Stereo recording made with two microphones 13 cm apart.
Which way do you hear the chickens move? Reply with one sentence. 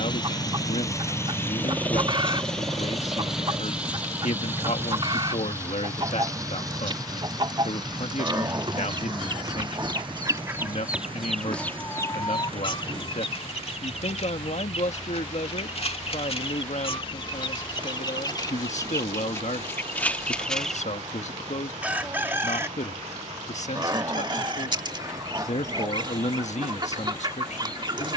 In this clip you hear the chickens move from right to left and back again.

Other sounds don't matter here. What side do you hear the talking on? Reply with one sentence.
You can hear the talking on the left.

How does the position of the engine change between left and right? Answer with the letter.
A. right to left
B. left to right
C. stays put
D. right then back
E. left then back
B.